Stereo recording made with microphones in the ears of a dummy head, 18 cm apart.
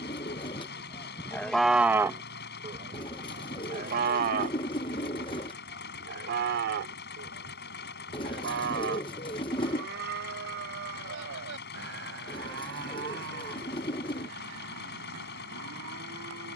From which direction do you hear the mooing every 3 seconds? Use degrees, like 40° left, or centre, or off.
centre, 50° right, 60° right, 70° right, 70° right, 70° right.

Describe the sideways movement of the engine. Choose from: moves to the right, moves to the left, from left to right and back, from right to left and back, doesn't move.
doesn't move.